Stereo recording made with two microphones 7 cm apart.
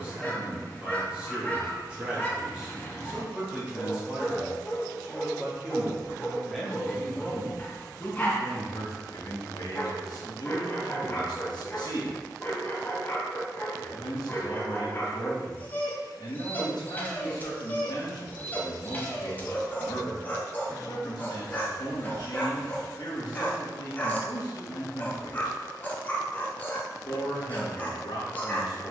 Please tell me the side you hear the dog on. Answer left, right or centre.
left.